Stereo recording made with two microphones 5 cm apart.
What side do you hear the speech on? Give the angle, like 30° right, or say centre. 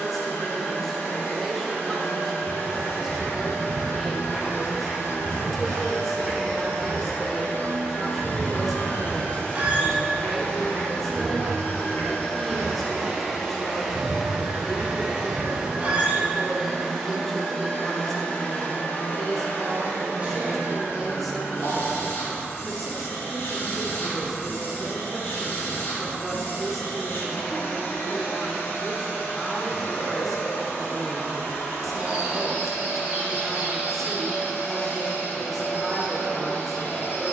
centre.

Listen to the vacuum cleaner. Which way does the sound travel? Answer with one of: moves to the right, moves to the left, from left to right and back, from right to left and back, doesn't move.
from left to right and back.